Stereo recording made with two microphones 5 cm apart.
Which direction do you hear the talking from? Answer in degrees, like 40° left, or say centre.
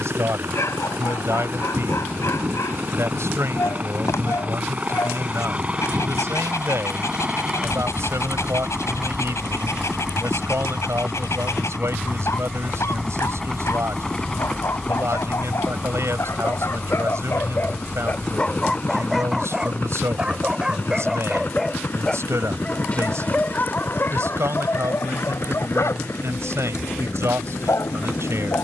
60° right.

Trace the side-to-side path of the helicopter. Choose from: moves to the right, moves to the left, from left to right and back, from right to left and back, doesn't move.
moves to the left.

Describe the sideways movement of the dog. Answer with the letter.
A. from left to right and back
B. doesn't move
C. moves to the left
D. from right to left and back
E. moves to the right
A.